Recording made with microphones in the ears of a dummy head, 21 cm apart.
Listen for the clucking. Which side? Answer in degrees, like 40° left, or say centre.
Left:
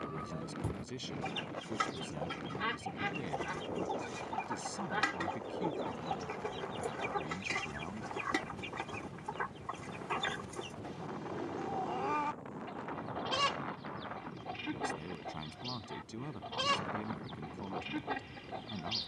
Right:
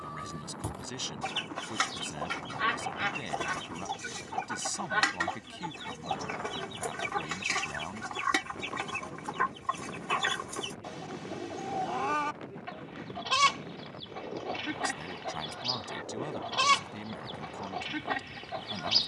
40° right.